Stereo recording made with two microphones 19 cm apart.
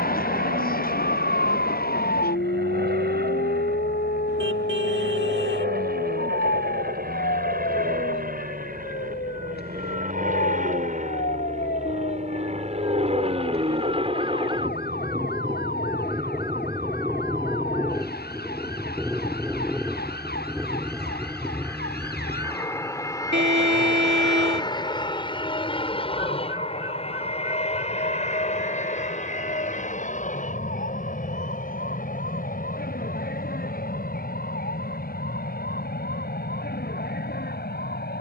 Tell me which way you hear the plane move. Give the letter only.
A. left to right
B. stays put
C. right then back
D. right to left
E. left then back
D.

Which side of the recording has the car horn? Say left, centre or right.
right.